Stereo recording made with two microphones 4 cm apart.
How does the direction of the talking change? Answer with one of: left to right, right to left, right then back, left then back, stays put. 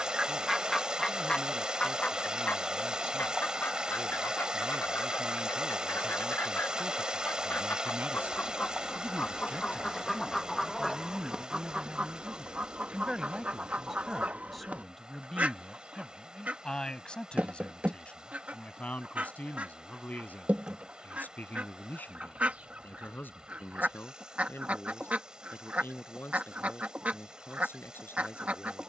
right to left.